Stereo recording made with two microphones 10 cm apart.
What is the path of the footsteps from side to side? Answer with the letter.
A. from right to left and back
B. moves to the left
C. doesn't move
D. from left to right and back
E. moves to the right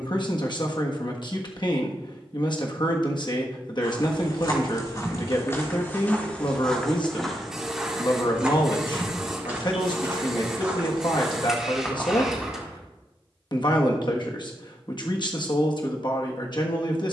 D.